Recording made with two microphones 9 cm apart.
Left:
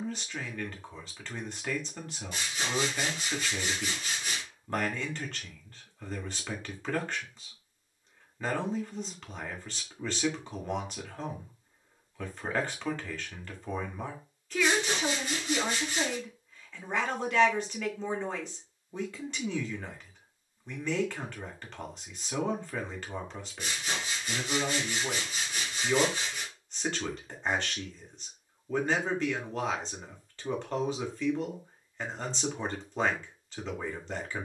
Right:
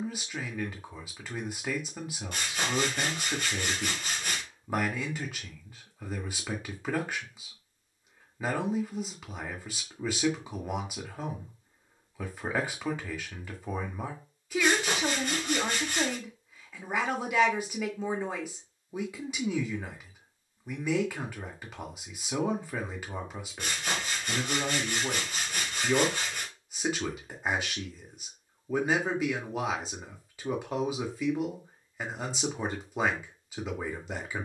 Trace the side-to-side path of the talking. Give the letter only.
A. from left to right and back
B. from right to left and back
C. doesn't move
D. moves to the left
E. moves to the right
C.